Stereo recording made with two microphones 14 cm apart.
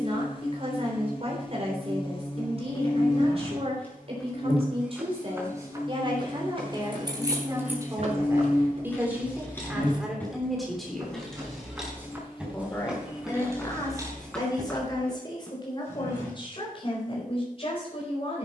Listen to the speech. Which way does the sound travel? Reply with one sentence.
You can hear the speech move to the left.